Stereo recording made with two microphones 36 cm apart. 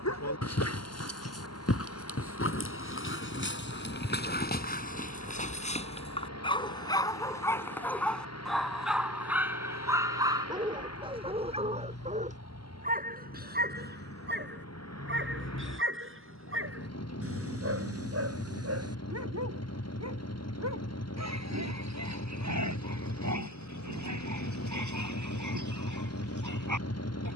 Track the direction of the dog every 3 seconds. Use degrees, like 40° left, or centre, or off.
40° left, 30° left, 10° left, 10° right, 30° right, 40° right, 40° right, 50° right, 50° right.